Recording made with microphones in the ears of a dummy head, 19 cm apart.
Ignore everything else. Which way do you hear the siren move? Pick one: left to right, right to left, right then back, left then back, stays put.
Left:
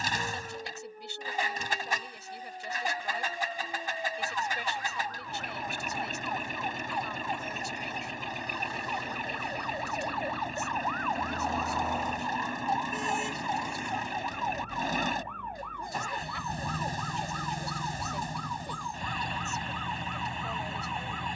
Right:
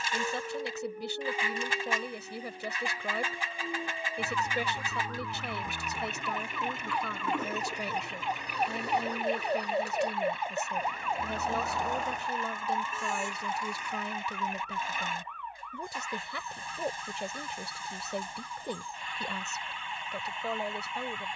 right to left.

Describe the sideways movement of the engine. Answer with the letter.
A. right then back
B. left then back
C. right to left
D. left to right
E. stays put
E.